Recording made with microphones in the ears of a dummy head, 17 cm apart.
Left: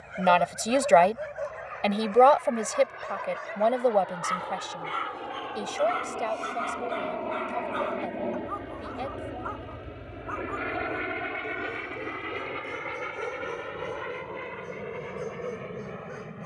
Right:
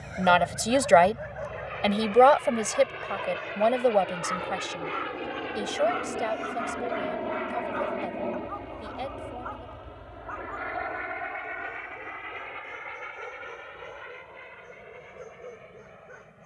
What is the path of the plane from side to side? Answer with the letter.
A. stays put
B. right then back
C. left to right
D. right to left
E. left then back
D.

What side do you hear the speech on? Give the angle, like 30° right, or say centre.
centre.